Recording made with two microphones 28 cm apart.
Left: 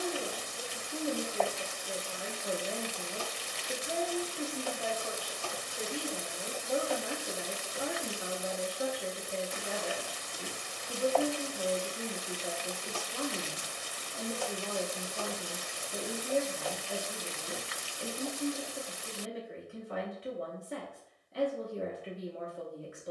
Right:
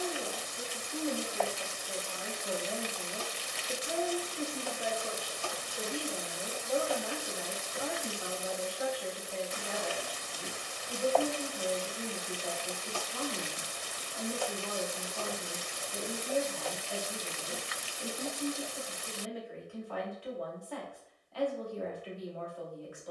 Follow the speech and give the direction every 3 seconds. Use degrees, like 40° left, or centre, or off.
20° left, 10° right, 20° left, 20° left, 20° left, 20° left, 20° left, 20° left.